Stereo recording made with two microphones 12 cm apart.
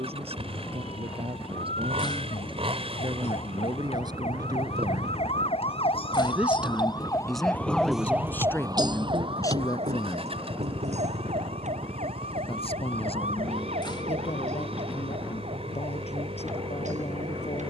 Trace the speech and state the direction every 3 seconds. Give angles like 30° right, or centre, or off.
50° right, 40° right, centre, 30° left, 60° left, 60° left.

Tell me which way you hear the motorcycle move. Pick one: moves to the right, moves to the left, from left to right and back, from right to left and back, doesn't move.
doesn't move.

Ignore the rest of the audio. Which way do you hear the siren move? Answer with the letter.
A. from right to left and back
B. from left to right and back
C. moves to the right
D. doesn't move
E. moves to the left
C.